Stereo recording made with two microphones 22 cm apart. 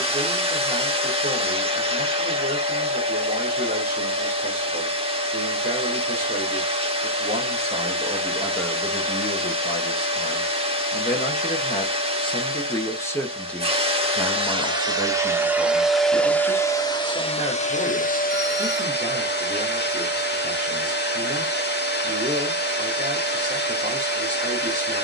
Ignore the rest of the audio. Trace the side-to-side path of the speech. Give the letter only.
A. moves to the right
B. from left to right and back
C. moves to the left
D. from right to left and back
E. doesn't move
D.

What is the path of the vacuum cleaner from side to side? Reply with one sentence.
In this clip you hear the vacuum cleaner move to the left.